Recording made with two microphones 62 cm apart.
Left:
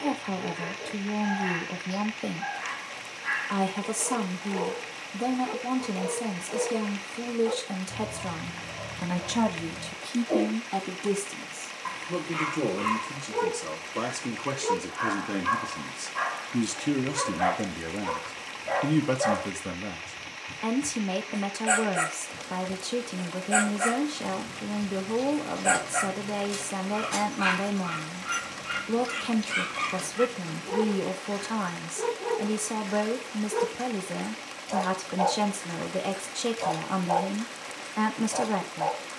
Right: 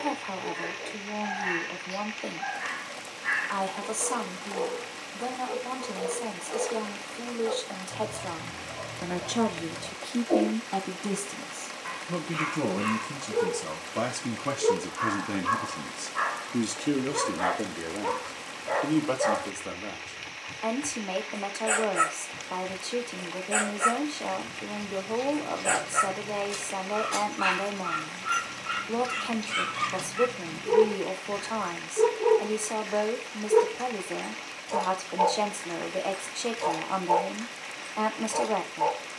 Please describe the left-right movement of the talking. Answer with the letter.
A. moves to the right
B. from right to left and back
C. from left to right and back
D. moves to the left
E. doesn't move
C.